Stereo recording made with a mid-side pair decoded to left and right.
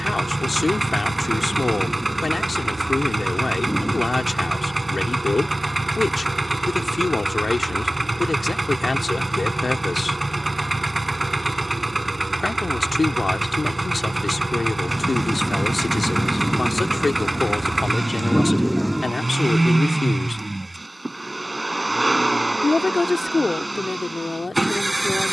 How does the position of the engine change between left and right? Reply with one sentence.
In this clip you hear the engine stay put.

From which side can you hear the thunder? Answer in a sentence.
You can hear the thunder in the centre.